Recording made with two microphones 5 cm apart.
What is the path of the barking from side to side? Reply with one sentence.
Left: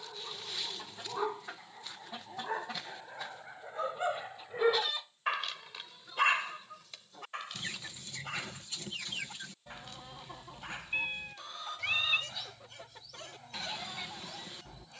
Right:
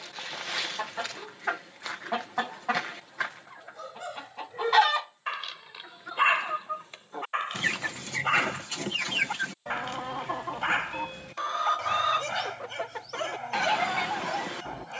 You can hear the barking travel towards the right.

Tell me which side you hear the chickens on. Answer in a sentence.
In this clip you hear the chickens on the right.